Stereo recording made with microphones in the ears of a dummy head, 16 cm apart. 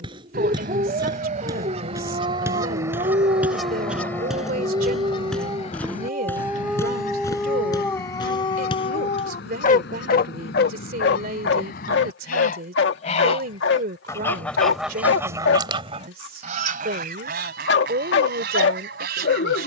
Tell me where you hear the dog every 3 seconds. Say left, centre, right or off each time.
right, right, centre, left, left, left, left.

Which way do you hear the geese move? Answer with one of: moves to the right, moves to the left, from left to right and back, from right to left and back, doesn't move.
from right to left and back.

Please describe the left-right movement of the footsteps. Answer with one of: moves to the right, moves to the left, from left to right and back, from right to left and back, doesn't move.
moves to the left.